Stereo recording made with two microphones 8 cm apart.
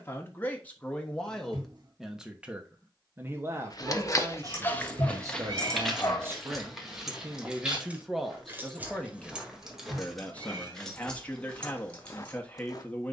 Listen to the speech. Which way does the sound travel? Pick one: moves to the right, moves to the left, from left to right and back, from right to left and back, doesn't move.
from left to right and back.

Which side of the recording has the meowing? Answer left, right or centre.
right.